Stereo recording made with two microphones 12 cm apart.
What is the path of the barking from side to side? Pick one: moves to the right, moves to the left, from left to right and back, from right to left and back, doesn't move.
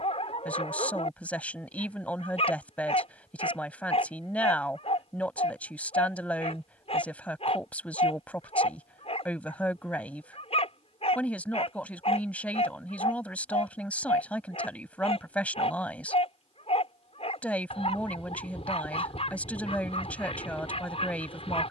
doesn't move.